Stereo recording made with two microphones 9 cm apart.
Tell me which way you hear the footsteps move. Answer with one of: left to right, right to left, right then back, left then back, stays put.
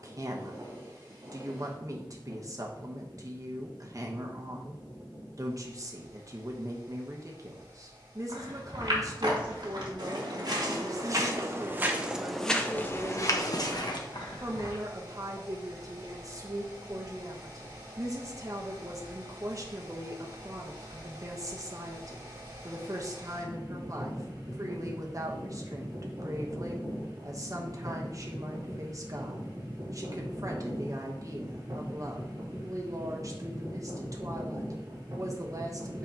right to left.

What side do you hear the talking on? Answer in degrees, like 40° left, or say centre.
40° right.